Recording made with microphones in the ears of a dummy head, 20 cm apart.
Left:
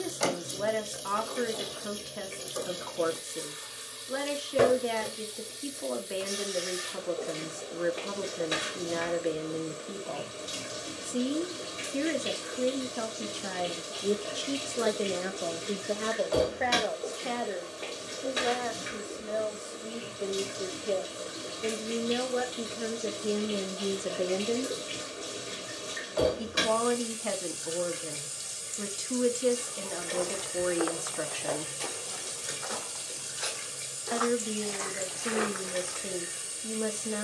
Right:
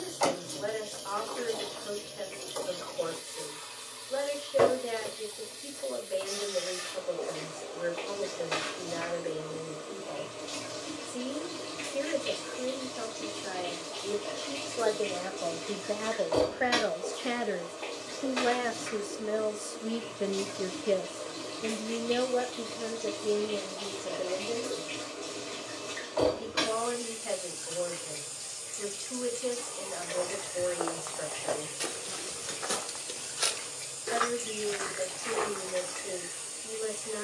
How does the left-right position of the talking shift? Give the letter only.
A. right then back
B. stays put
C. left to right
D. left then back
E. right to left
A.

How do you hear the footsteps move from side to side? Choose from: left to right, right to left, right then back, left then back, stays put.
right then back.